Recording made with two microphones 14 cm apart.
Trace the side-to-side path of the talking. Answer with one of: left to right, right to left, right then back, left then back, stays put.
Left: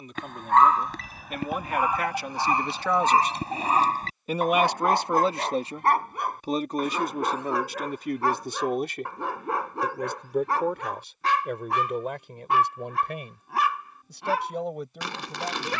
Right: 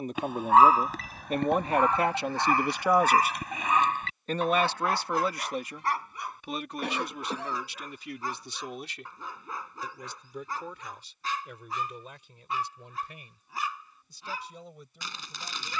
right to left.